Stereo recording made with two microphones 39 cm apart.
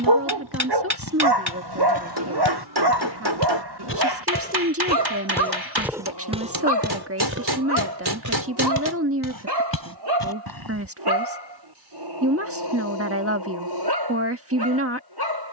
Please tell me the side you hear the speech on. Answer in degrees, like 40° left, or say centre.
40° right.